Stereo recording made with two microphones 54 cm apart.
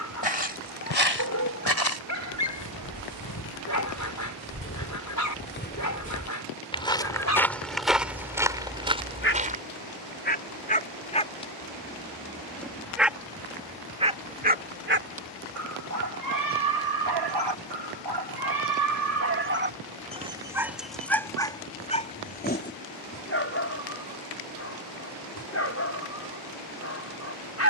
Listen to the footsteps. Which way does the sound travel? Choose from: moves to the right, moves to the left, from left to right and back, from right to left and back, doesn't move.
moves to the right.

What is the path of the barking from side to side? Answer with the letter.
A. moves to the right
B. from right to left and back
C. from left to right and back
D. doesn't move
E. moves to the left
C.